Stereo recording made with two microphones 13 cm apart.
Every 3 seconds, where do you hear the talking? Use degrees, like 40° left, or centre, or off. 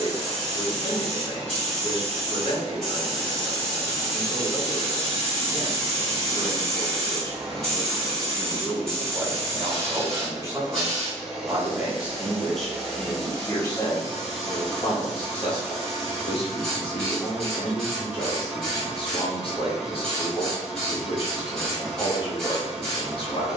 50° left, 50° left, 20° left, 20° right, 20° left, 50° left, 50° left, 50° left.